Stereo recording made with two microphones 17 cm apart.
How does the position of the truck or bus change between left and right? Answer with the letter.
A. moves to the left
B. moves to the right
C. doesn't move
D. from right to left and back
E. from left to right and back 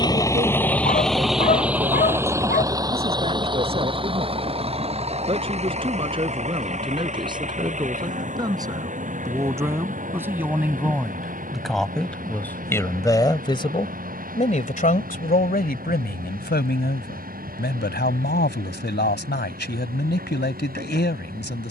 B.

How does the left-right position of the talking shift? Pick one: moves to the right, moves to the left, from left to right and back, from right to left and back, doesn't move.
moves to the left.